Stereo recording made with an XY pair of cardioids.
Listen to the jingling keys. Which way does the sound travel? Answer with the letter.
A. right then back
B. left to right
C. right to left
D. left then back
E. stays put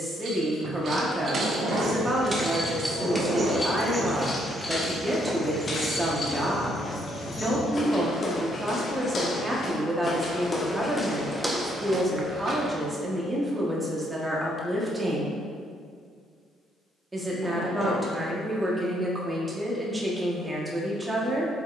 C.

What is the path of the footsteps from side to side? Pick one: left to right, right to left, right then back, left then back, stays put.
left then back.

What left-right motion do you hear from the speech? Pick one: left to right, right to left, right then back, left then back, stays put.
stays put.